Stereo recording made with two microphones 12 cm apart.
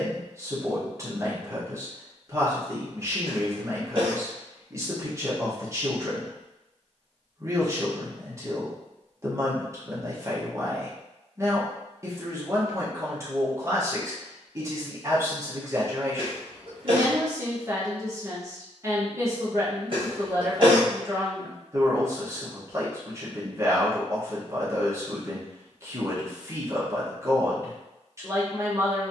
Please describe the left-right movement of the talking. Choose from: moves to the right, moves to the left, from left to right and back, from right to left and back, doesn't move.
doesn't move.